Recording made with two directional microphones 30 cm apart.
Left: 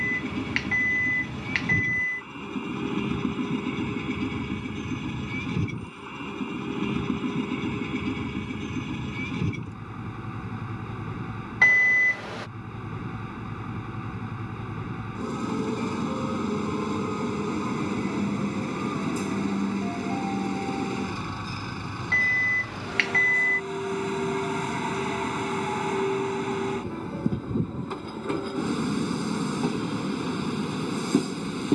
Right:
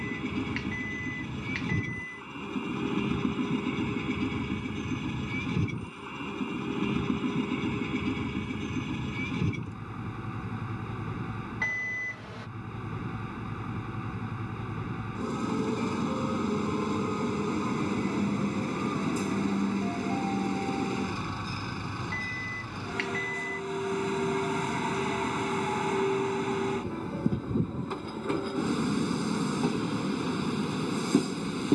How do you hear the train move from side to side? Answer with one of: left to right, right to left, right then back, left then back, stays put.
stays put.